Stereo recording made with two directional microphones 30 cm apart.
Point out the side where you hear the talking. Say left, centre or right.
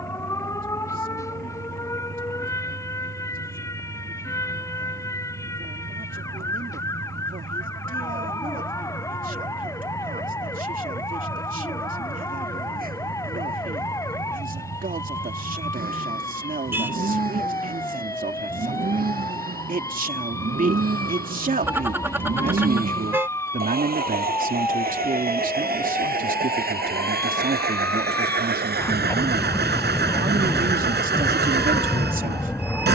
right.